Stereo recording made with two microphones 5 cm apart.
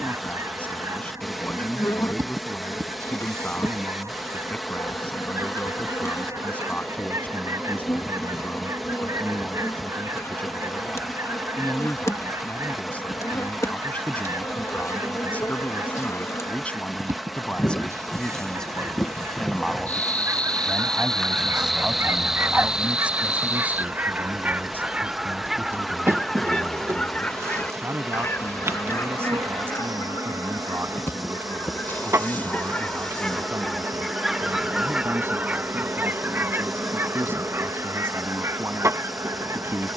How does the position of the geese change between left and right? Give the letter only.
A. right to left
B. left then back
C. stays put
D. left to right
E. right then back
B.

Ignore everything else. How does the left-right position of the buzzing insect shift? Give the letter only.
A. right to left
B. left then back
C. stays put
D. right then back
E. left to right
E.